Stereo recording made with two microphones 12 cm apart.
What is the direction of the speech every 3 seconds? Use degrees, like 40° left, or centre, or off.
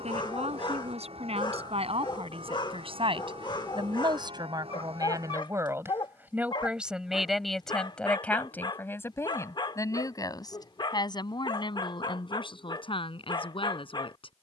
60° right, 30° right, centre, 30° left, 50° left.